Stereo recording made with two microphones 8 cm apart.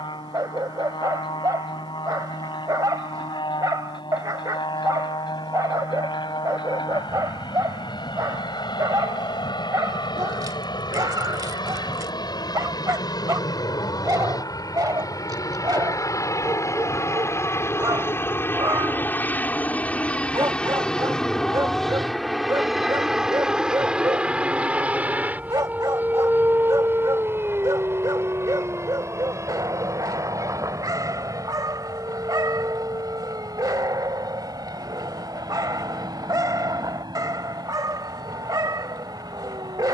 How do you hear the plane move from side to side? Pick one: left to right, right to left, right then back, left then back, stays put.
left to right.